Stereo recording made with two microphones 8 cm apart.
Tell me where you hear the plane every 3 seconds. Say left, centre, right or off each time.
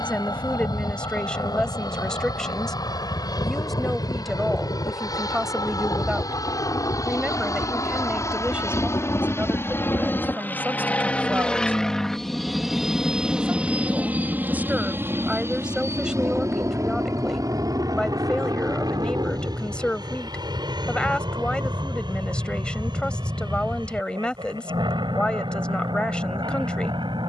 left, left, left, left, centre, right, right, right, right.